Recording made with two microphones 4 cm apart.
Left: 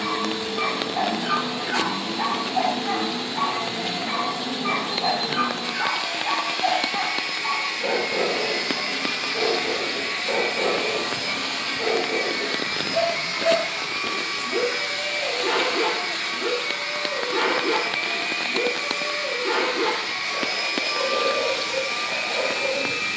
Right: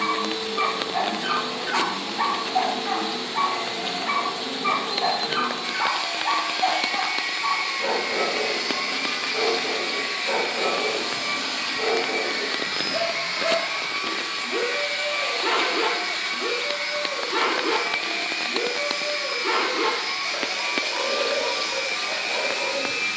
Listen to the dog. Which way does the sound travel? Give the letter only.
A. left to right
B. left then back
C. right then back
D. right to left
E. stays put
E.